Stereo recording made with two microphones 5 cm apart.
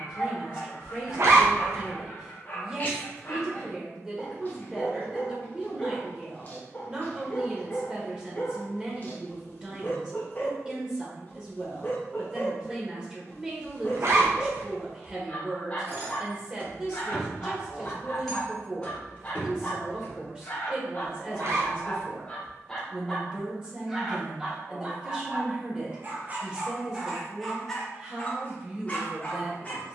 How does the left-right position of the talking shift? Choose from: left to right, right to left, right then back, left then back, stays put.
stays put.